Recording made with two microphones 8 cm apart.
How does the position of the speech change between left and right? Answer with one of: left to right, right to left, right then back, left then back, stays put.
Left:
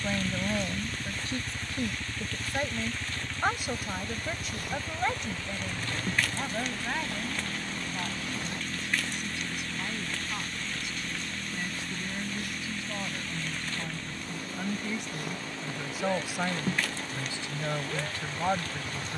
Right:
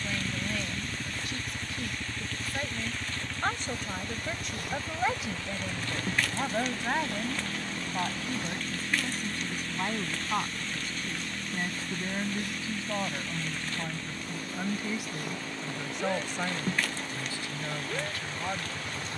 right then back.